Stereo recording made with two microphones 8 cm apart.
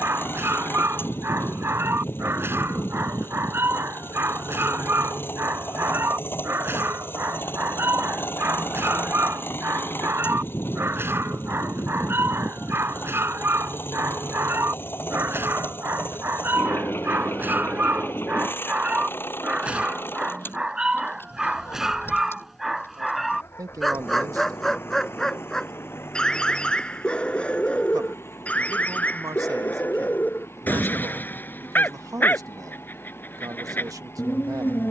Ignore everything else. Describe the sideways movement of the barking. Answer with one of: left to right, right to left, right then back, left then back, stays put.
right to left.